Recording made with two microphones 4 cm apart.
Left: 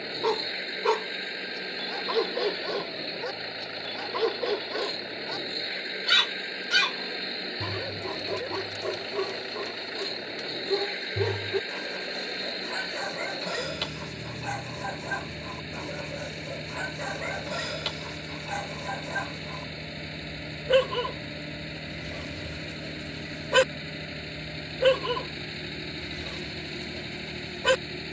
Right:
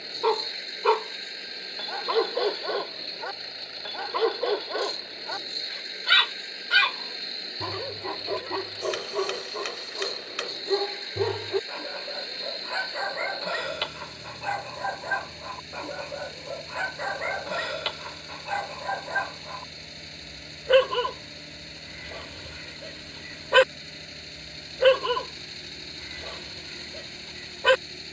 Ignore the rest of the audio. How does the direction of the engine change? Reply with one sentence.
In this clip you hear the engine stay in one place.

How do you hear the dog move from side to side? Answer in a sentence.
You can hear the dog stay put.